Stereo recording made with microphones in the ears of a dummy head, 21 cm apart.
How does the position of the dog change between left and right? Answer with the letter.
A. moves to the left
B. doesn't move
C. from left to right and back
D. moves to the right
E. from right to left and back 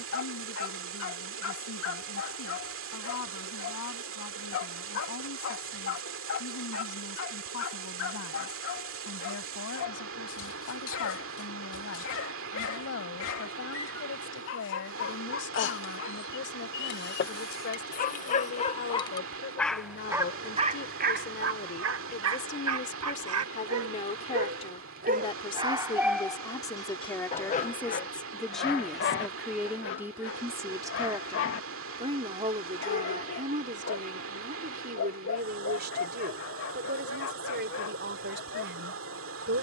C.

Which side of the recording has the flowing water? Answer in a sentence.
You can hear the flowing water on the right.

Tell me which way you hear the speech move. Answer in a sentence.
In this clip you hear the speech move to the right.